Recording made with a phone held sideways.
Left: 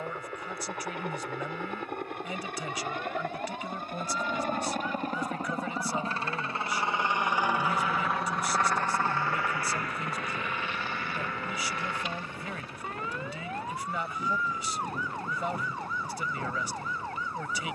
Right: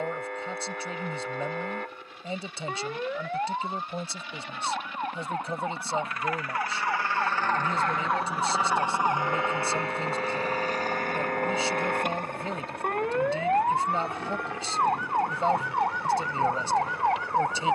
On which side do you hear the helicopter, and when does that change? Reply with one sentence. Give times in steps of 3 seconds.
You can hear the helicopter on the left from 0 s, in the centre from 6 s and on the right from 9 s.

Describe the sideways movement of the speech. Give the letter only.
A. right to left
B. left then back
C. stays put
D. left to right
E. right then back
C.